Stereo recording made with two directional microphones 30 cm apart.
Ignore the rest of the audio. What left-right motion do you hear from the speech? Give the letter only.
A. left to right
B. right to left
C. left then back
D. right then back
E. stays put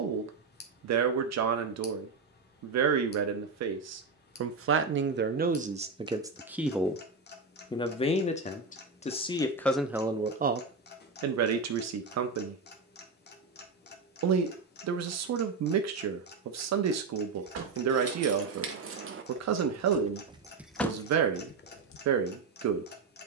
C.